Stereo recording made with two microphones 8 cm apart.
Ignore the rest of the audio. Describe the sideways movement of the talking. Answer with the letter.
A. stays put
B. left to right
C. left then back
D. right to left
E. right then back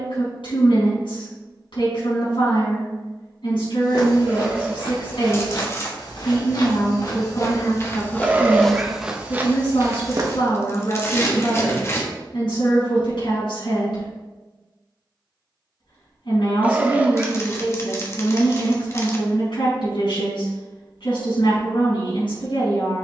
A.